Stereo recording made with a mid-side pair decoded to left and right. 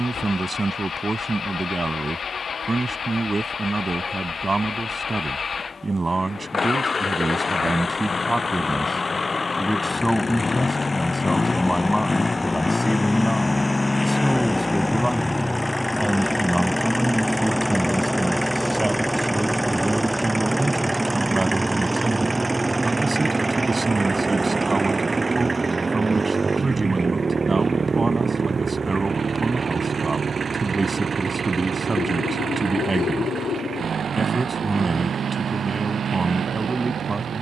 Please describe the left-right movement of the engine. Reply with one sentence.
In this clip you hear the engine travel towards the right.